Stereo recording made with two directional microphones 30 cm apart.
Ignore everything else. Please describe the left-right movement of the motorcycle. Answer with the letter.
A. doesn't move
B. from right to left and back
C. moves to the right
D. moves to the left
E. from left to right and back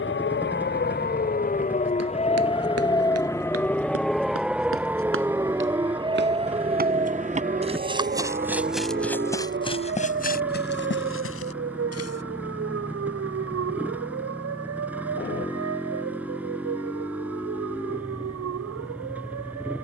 A.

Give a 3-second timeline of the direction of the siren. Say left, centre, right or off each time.
left, centre, right, right, right, right, right.